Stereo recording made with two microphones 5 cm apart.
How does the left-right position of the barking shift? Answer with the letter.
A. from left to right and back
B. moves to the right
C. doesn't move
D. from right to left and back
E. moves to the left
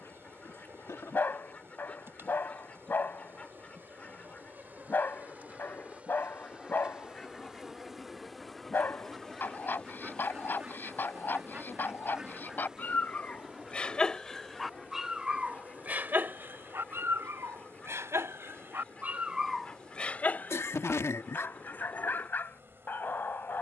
A.